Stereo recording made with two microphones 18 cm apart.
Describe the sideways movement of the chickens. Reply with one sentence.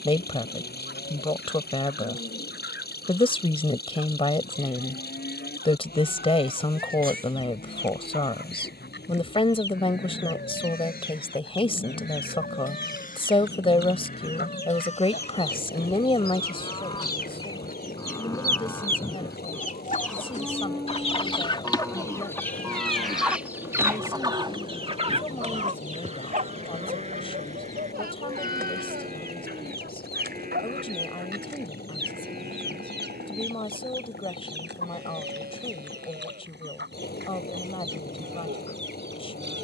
You can hear the chickens move from left to right.